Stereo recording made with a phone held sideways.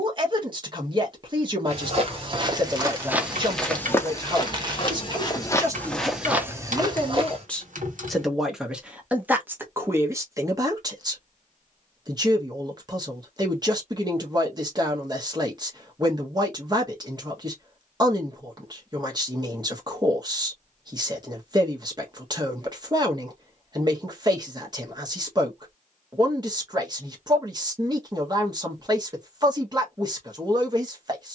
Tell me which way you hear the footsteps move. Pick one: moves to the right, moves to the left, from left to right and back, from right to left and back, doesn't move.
from right to left and back.